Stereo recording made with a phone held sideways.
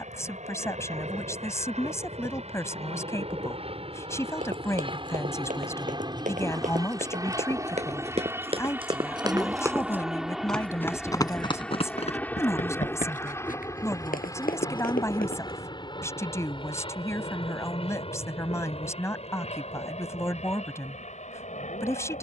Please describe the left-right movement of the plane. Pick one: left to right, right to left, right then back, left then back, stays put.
right to left.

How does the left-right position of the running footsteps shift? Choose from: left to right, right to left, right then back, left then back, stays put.
right to left.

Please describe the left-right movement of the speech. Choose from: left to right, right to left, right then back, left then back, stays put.
stays put.